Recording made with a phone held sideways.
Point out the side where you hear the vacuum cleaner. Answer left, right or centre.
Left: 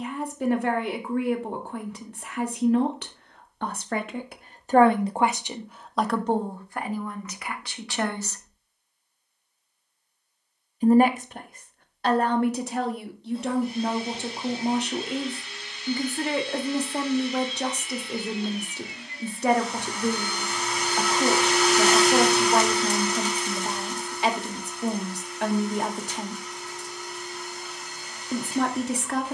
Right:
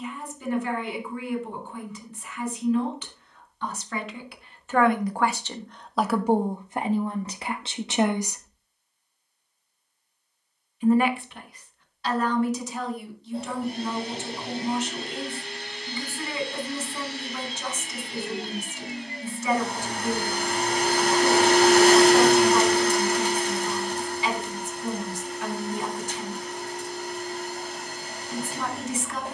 right.